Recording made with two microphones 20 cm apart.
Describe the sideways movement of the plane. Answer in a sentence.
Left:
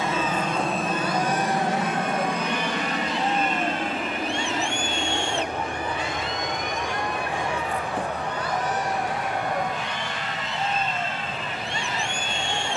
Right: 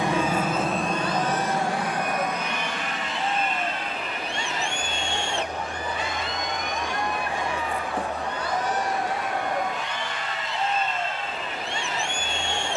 You can hear the plane travel towards the left.